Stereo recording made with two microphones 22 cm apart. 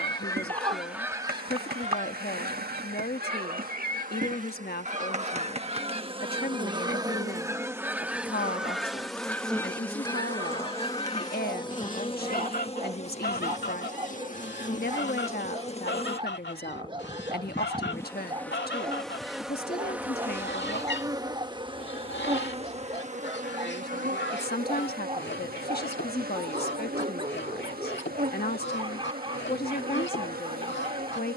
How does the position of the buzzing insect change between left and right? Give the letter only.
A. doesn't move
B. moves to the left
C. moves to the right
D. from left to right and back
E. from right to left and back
E.